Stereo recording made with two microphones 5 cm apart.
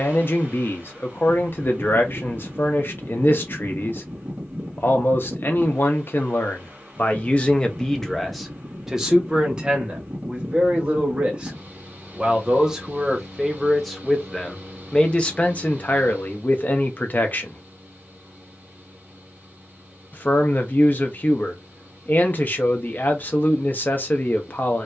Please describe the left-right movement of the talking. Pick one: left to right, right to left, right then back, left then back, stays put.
right then back.